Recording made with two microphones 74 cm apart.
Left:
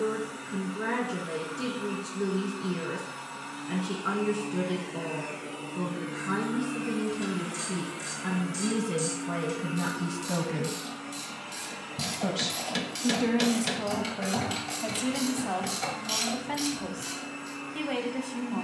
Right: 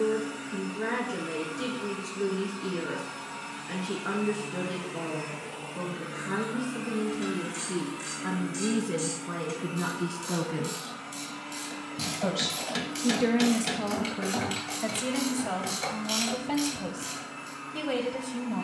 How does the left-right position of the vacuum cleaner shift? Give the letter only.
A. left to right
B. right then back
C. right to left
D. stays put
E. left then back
C.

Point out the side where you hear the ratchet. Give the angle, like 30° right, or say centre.
30° left.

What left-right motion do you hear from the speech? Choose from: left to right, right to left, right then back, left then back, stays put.
left to right.